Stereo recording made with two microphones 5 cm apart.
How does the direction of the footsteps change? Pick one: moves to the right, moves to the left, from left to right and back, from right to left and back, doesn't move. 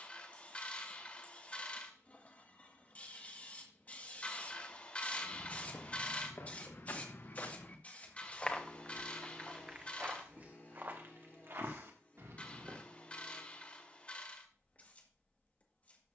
moves to the right.